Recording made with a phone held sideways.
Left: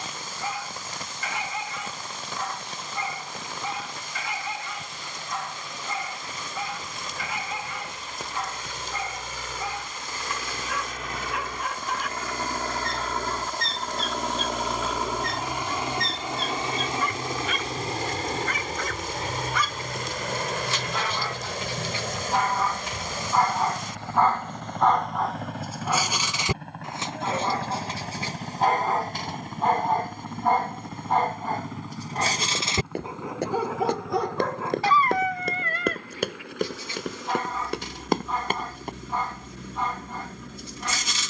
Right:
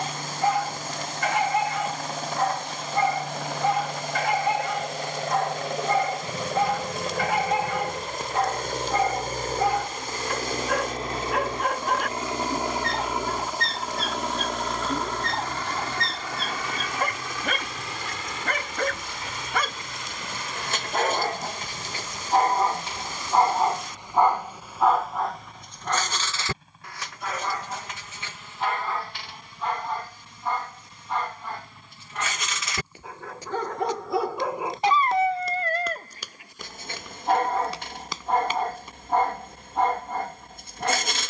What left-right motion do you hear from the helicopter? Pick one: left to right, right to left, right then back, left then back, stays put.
right to left.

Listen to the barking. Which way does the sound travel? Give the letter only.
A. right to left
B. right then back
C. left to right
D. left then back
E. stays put
D.